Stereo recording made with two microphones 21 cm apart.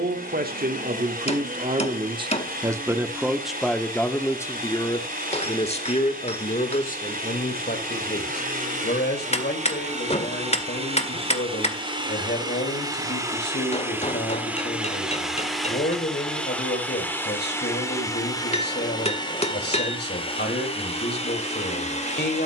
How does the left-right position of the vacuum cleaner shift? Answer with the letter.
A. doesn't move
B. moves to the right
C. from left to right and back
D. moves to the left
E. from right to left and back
D.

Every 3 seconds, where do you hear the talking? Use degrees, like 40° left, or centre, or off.
30° right, 10° left, 40° left, 50° left, 50° left, 50° left, 50° left, 50° left.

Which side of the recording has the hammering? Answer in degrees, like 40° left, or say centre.
30° left.